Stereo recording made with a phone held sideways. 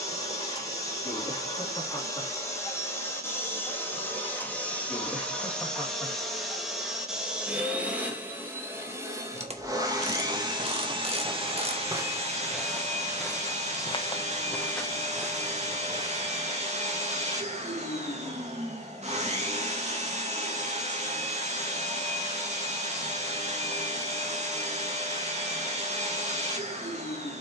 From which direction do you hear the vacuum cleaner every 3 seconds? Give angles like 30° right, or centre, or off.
20° left, 10° left, 10° right, 30° right, 40° right, 40° right, 40° right, 40° right, 40° right.